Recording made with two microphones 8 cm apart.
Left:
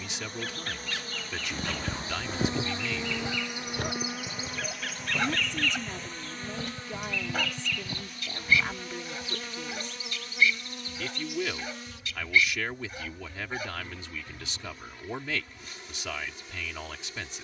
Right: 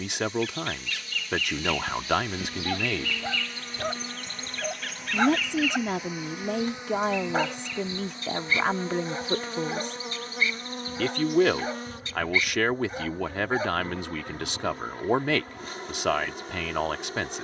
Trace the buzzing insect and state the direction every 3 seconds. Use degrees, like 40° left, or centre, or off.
40° left, 10° left, 20° right, 40° right, 50° right, 50° right.